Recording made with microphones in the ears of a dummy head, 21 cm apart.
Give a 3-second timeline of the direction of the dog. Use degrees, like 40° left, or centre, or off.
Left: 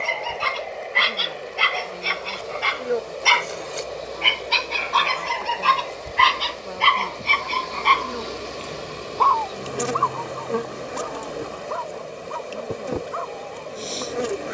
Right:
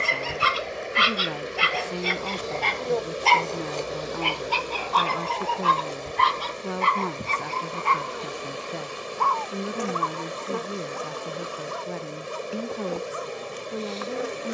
centre, 30° left, 50° left, 60° left, 60° left.